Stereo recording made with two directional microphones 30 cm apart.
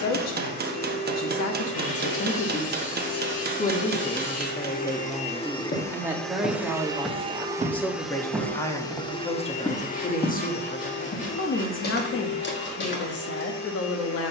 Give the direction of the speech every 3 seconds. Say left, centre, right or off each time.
left, centre, centre, left, left.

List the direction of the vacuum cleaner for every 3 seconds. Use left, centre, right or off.
left, left, centre, left, left.